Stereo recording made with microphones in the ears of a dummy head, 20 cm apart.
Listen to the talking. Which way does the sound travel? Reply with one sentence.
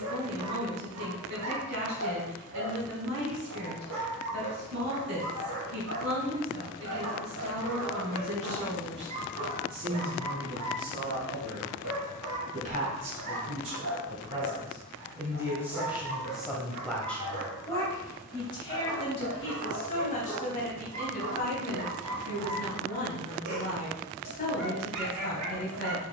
You can hear the talking travel towards the left.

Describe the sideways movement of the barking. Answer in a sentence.
In this clip you hear the barking stay put.